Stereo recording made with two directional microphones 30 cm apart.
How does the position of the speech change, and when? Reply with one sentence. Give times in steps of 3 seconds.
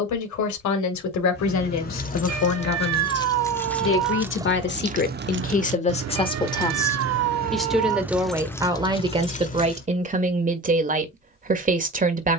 In this clip you hear the speech on the left from 0 s, in the centre from 6 s and on the right from 9 s.